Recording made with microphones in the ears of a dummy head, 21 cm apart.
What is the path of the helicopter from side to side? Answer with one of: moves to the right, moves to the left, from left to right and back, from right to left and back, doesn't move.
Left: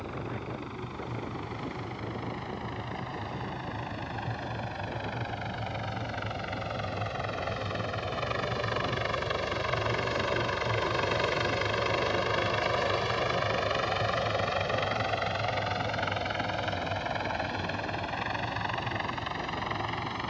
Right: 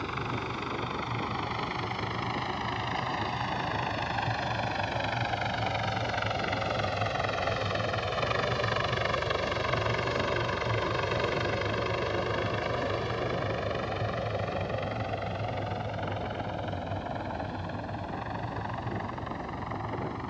moves to the left.